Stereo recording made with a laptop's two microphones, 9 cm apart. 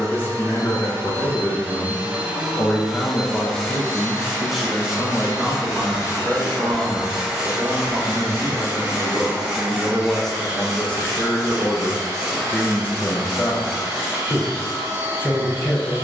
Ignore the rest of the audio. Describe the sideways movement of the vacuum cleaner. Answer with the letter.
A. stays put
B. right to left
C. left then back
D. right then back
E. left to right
C.